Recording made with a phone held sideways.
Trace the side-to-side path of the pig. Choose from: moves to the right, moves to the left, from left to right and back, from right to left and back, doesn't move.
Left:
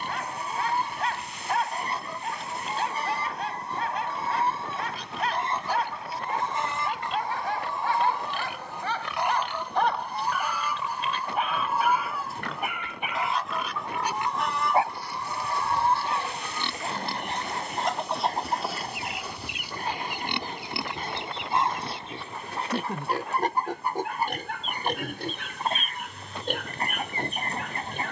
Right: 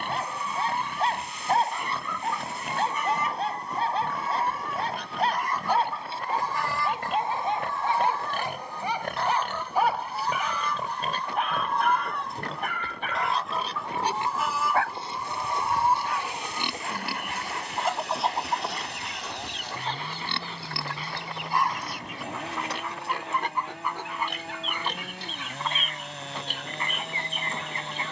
moves to the left.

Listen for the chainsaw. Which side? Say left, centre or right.
right.